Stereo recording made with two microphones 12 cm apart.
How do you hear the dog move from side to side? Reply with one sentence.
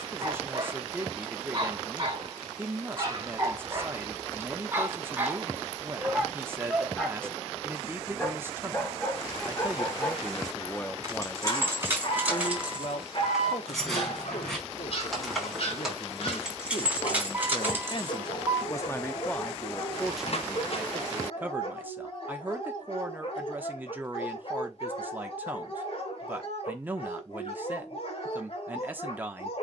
In this clip you hear the dog move from right to left.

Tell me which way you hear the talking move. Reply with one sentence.
In this clip you hear the talking move from right to left and back again.